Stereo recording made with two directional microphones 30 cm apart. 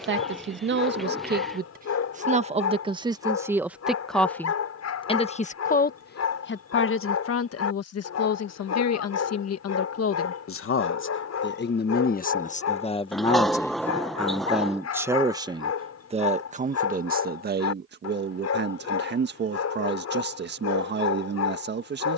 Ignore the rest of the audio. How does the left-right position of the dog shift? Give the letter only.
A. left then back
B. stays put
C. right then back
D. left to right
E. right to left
B.